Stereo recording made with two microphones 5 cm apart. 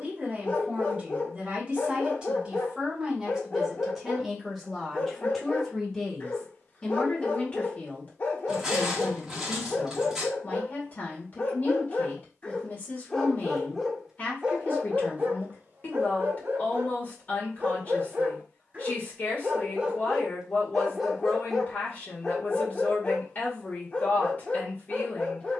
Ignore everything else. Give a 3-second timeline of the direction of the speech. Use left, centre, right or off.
right, centre, left, left, left, left, left, left, left.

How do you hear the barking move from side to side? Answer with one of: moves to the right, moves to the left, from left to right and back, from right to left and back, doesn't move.
from left to right and back.